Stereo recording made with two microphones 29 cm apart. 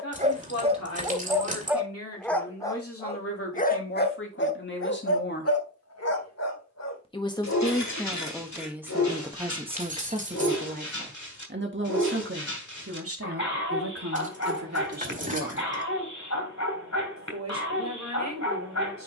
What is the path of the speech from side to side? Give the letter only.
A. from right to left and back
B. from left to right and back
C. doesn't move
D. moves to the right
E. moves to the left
D.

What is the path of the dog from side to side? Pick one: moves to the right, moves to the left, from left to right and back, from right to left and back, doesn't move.
moves to the left.